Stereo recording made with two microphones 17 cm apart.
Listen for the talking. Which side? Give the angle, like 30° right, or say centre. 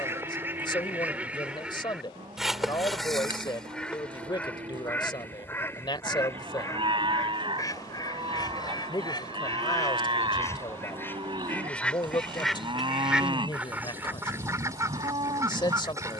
30° left.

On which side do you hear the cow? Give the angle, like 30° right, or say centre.
30° right.